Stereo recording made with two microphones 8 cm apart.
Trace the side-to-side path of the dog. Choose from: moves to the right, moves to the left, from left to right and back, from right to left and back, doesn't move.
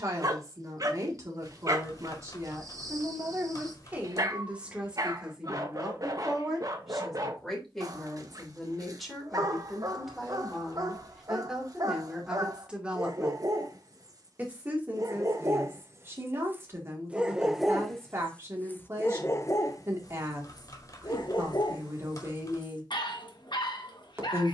moves to the left.